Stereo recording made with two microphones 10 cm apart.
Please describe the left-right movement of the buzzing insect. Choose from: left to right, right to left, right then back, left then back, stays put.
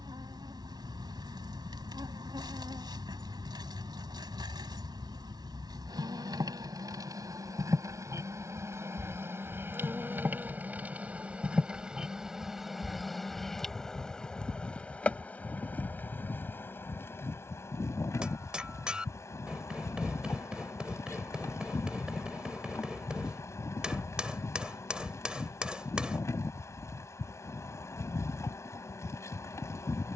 right to left.